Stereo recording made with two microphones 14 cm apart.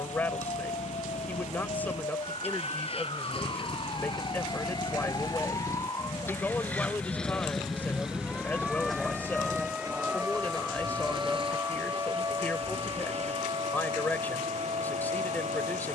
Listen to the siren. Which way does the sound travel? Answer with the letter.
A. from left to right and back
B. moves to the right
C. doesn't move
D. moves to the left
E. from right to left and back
B.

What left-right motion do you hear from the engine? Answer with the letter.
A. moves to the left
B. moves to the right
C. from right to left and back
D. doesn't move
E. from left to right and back
B.